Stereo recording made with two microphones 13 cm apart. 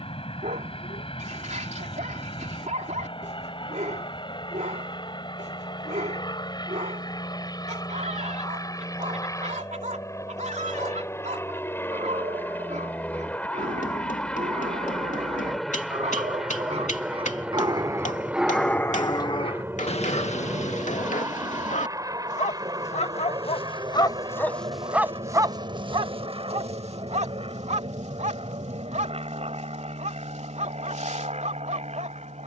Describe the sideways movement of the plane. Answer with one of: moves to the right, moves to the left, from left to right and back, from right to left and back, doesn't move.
moves to the right.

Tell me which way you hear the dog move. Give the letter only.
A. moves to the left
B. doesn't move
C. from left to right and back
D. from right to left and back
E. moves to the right
D.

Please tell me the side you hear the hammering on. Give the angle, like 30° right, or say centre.
80° left.